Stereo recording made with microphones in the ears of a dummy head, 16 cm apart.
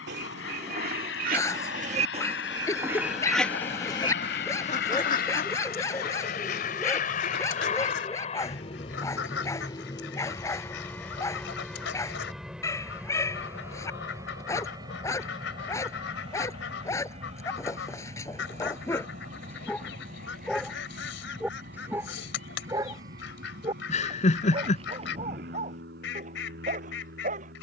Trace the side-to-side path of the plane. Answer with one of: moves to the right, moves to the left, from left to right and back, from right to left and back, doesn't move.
moves to the right.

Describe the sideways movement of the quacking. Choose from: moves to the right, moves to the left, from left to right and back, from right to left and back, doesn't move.
moves to the left.